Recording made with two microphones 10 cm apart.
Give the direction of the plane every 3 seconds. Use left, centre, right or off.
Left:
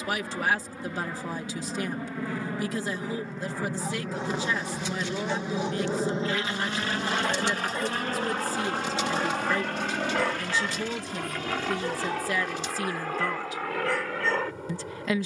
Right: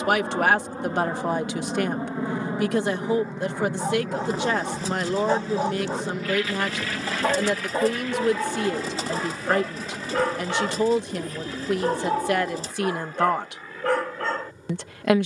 right, centre, left, left, left.